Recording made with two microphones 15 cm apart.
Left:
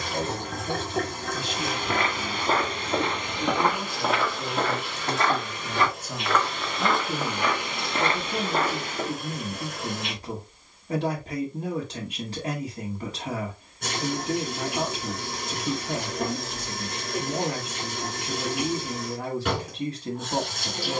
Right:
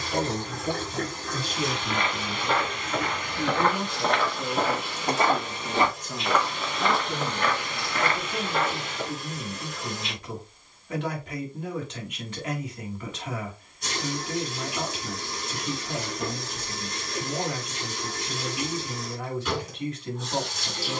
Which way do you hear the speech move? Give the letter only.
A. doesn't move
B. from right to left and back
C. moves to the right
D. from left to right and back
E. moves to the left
E.